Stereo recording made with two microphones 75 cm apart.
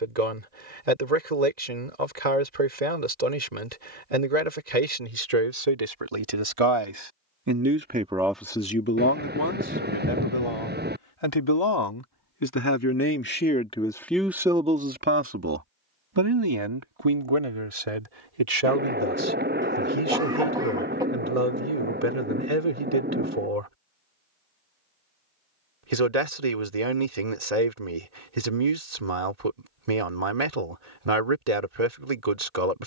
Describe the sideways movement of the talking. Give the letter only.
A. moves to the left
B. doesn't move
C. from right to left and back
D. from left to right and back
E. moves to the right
C.